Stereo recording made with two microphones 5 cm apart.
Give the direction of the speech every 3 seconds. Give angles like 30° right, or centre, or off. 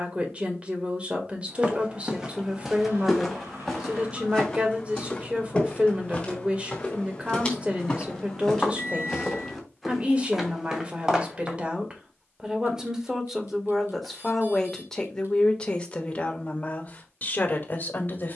30° right, 30° right, 30° right, 30° right, centre, 30° left.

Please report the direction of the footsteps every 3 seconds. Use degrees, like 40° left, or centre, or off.
10° right, 10° left, 20° left, centre, off, off.